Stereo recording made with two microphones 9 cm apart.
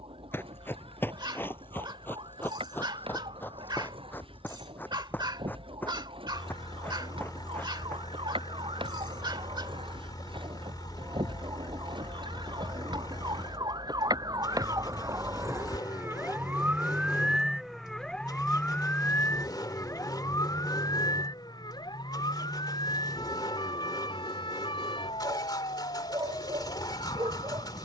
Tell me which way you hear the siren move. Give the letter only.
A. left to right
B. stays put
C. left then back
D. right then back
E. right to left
E.